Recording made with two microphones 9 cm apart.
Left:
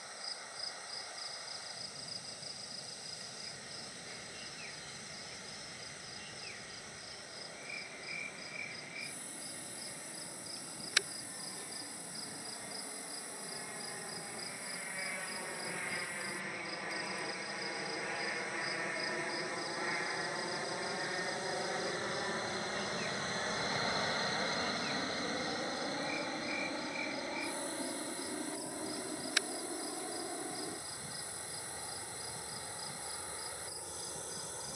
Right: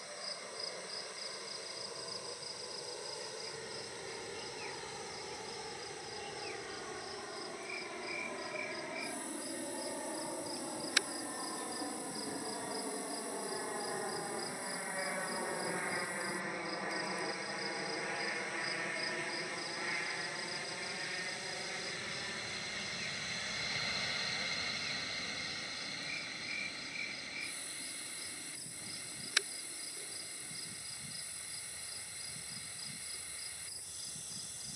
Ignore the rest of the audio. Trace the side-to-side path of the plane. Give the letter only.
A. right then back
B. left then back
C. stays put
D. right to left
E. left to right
D.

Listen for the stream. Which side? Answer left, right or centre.
left.